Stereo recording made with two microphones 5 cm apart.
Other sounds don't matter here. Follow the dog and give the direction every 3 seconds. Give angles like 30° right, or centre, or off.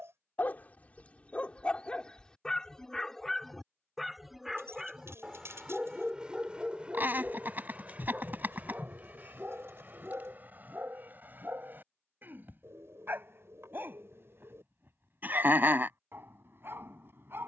20° left, 10° right, 30° right, 40° right, 50° right, 50° right.